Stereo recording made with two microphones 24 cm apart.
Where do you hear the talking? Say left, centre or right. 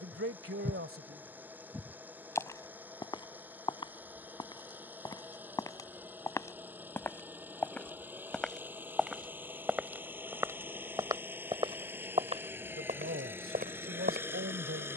right.